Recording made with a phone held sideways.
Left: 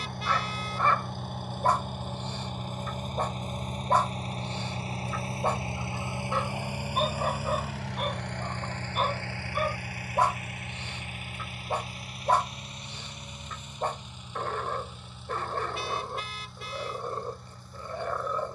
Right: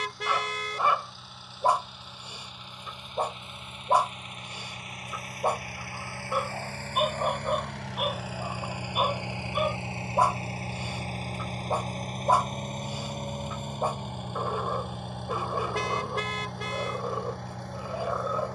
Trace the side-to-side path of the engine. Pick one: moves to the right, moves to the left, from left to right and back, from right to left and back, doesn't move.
moves to the right.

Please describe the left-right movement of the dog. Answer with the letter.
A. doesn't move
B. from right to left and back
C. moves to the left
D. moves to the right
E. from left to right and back
A.